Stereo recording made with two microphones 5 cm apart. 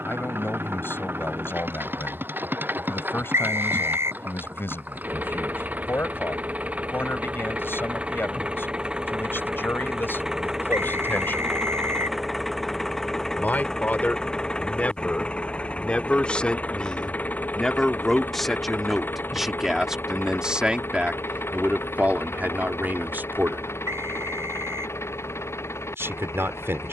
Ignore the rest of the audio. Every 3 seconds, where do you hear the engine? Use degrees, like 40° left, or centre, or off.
50° right, 40° right, 30° right, 10° right, 10° left, 30° left, 40° left, 60° left, 60° left.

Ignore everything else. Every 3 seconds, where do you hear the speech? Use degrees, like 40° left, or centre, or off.
50° left, 50° left, 50° left, 50° left, 30° left, 20° left, 10° right, 40° right, 60° right.